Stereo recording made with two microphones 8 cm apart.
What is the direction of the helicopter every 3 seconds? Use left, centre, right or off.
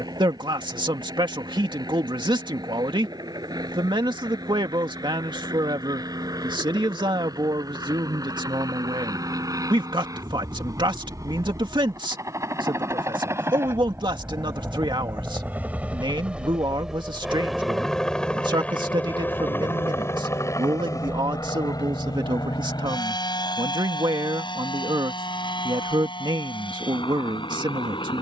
right, right, right, right, right, centre, left, left, left, left.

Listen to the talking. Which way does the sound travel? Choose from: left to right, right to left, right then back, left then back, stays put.
stays put.